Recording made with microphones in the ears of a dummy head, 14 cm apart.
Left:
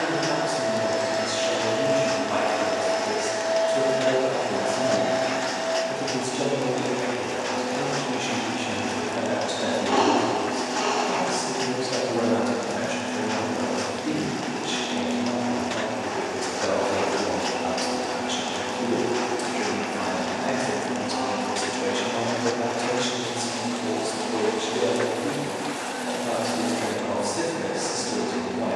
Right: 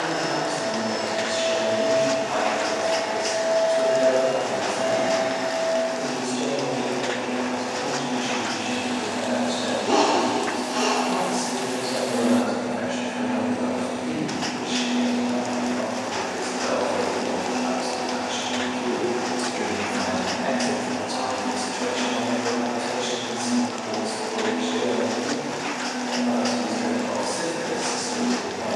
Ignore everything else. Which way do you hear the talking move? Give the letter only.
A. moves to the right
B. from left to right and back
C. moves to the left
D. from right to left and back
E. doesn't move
B.